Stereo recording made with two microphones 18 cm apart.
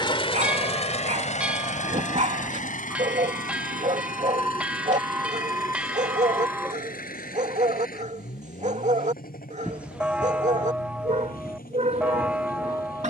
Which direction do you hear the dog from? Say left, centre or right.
right.